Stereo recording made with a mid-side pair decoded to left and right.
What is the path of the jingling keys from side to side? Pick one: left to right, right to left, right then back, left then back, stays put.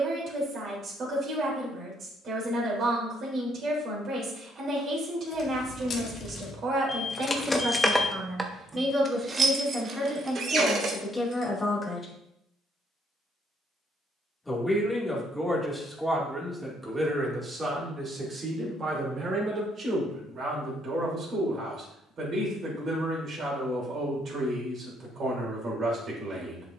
left to right.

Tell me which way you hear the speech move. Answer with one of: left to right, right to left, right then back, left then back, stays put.
left then back.